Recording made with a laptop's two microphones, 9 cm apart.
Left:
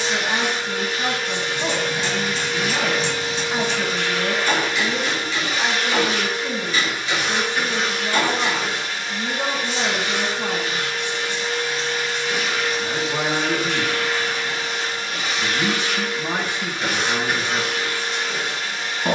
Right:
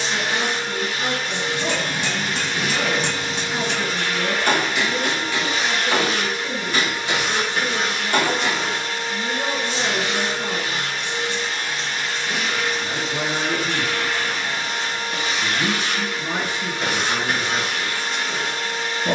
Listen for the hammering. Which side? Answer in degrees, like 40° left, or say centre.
50° right.